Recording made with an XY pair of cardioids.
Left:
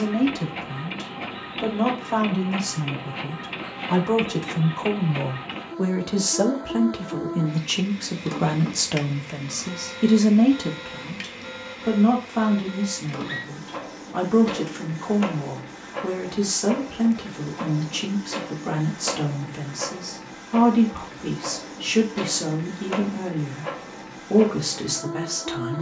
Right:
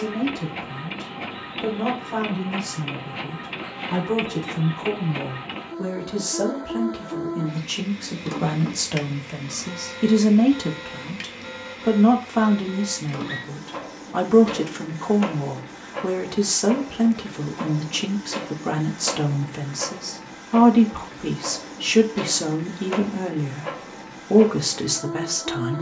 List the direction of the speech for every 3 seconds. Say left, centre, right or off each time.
left, left, left, centre, right, right, right, right, right.